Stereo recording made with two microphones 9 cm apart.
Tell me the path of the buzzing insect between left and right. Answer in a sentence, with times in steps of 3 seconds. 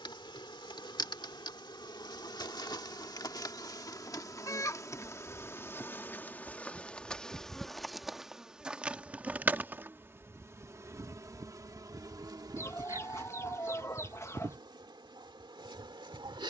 In this clip you hear the buzzing insect on the left from 0 s, in the centre from 6 s and on the right from 9 s.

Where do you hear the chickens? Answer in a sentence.
In this clip you hear the chickens on the left.